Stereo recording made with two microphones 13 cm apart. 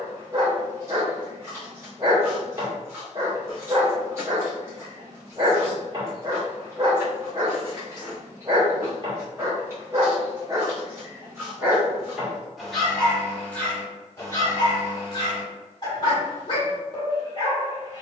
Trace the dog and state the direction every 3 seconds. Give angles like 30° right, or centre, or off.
30° right, 30° right, 30° right, 20° right, 10° left, 40° left.